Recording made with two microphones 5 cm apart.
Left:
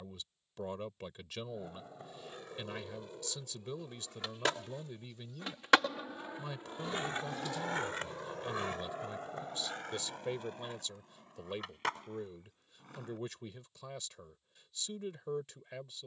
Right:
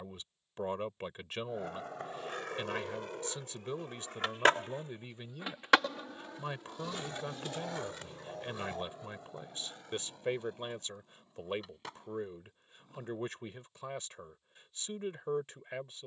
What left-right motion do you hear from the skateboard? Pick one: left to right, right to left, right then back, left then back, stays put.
right to left.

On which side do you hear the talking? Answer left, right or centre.
right.